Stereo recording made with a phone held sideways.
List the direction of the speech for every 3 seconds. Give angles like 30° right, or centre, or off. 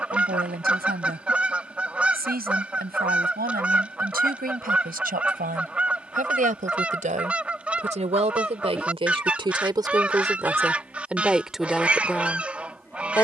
70° right, 70° right, 50° right, 20° right, 10° left.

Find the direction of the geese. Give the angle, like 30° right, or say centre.
10° right.